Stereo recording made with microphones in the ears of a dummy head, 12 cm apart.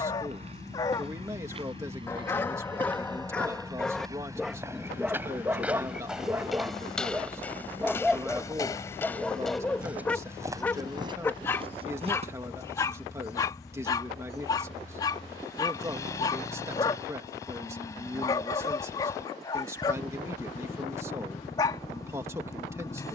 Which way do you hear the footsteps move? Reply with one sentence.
You can hear the footsteps go left and come back.